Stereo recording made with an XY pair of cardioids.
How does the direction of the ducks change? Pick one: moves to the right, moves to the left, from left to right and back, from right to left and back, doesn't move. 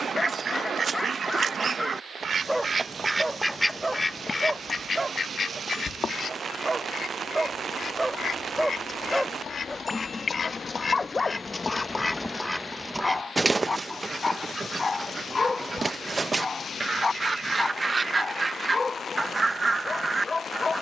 from right to left and back.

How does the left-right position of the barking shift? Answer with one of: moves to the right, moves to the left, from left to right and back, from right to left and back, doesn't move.
from left to right and back.